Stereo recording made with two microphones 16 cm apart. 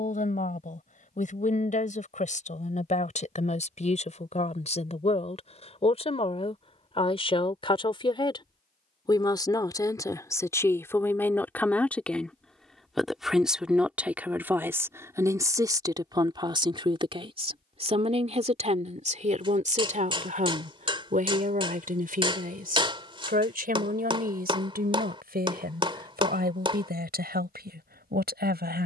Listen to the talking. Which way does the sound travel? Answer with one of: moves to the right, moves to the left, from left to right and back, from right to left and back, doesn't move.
moves to the right.